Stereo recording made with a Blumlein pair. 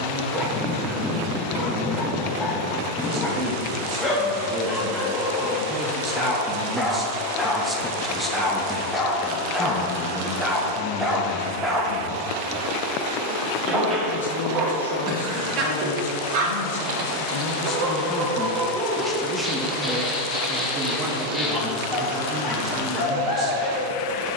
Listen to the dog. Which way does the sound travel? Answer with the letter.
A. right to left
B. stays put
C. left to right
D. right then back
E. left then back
D.